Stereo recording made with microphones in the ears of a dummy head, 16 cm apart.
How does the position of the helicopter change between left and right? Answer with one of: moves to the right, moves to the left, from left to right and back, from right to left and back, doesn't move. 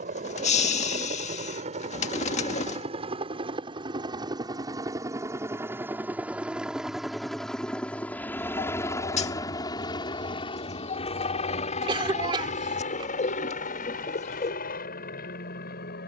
moves to the left.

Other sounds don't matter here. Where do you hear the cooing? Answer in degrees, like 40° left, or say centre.
40° left.